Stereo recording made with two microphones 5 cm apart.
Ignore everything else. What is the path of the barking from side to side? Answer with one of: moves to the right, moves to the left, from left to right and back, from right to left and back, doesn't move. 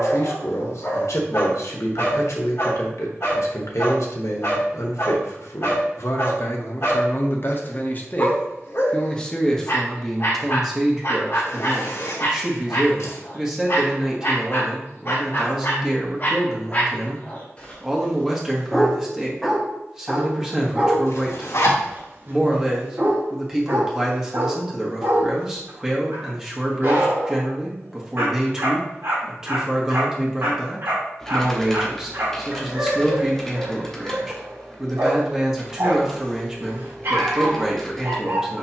moves to the right.